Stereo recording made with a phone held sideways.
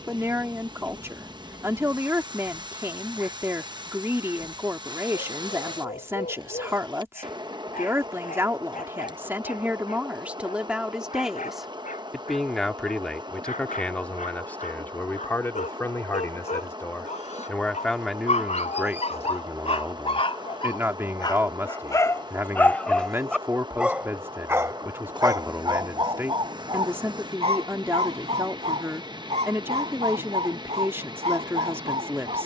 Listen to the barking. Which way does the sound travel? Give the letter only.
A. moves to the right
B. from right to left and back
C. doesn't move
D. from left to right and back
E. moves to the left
A.